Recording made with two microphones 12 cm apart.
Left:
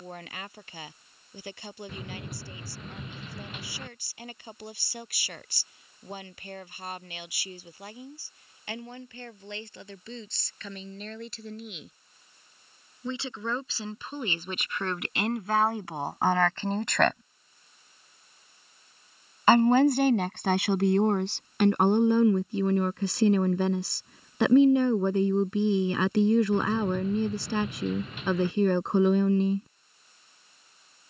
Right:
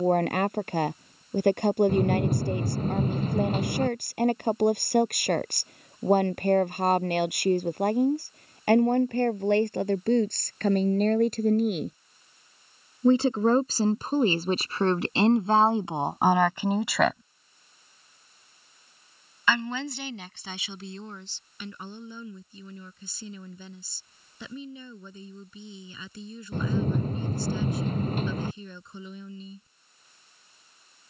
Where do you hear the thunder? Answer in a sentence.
In this clip you hear the thunder on the right.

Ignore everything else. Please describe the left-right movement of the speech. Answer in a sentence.
In this clip you hear the speech travel towards the left.